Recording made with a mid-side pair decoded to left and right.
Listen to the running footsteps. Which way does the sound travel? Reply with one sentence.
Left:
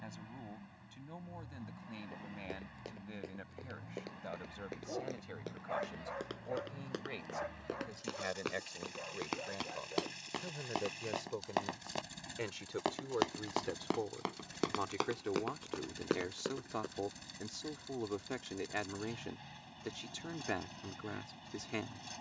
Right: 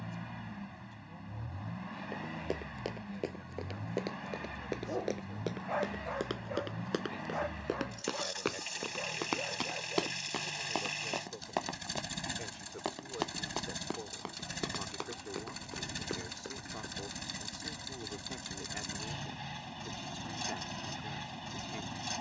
In this clip you hear the running footsteps travel towards the left.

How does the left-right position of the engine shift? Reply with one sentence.
In this clip you hear the engine stay put.